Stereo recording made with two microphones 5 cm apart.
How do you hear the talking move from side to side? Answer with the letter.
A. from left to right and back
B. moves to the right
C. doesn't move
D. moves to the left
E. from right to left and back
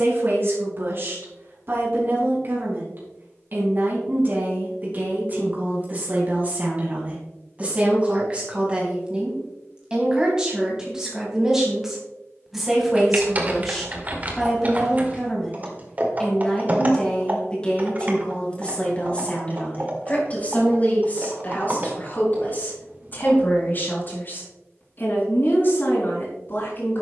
D.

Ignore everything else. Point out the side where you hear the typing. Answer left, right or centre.
right.